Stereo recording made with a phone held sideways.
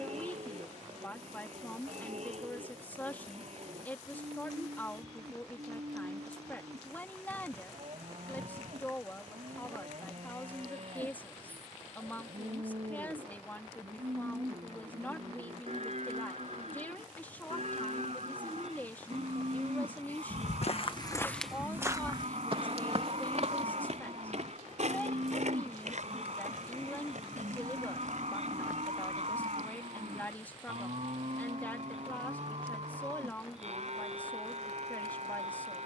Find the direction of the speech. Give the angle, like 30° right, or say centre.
10° left.